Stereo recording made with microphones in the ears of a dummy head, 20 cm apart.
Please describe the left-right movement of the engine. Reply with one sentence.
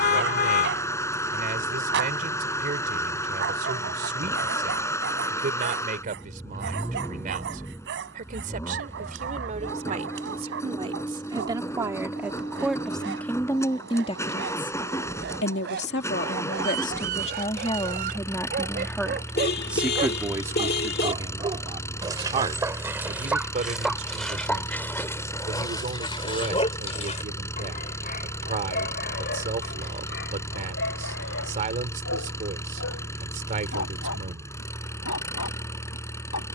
You can hear the engine stay put.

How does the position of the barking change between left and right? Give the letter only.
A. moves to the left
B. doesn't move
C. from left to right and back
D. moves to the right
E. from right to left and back
A.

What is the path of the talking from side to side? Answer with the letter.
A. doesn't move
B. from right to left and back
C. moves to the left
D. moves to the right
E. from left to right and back
B.